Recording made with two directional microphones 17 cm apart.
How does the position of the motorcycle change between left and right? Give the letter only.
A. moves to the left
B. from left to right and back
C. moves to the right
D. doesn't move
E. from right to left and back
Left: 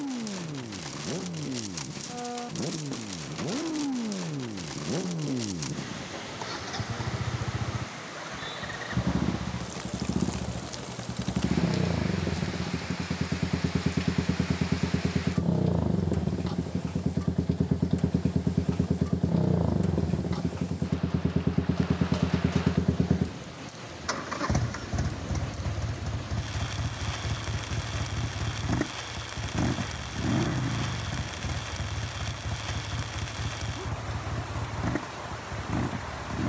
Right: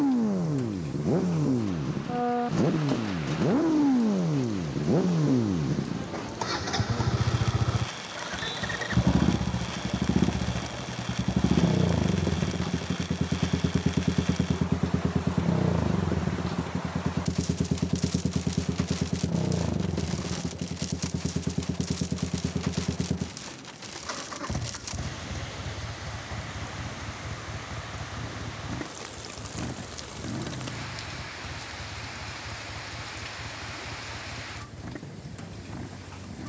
A.